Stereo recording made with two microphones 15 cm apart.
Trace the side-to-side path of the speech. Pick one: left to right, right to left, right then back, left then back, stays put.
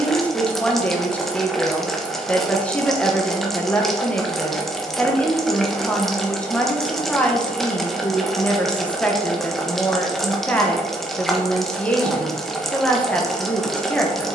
stays put.